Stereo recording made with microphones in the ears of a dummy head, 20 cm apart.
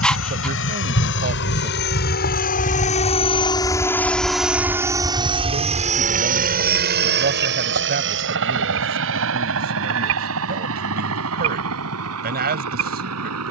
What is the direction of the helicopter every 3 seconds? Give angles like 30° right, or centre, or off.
50° left, centre, 50° right, 60° right, 70° right.